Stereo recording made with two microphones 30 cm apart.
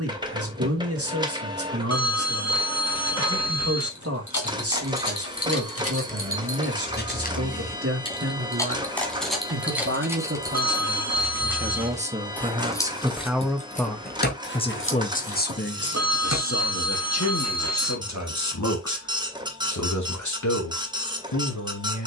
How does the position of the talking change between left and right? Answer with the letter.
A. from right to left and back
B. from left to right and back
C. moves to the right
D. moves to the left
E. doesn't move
D.